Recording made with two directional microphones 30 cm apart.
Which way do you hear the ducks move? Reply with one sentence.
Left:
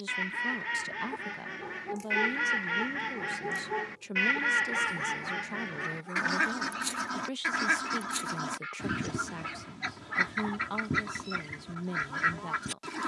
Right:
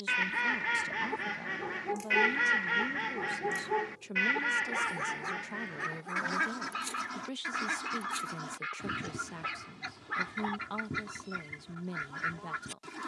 In this clip you hear the ducks go from the right side to the left.